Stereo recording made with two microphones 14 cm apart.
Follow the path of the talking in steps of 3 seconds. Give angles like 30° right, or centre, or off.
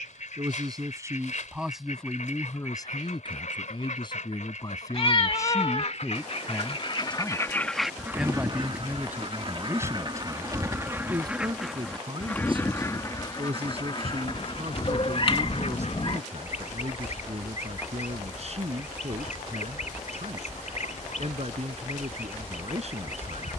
10° right, 30° left, centre, 20° right, 40° right, 50° right, 50° right, 50° right.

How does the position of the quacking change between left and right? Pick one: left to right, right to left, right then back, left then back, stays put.
right then back.